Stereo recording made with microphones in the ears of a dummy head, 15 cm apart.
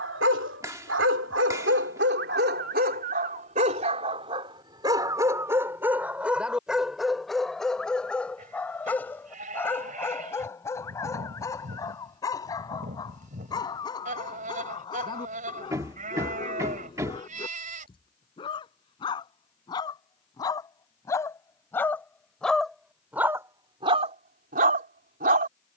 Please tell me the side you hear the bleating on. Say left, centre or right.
right.